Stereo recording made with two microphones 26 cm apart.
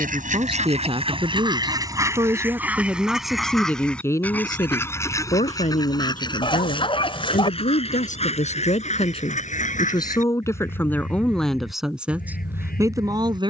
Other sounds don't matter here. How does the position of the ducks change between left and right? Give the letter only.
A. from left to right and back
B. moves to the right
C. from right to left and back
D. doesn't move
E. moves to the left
E.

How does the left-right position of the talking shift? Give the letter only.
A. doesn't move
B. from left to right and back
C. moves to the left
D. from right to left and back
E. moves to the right
D.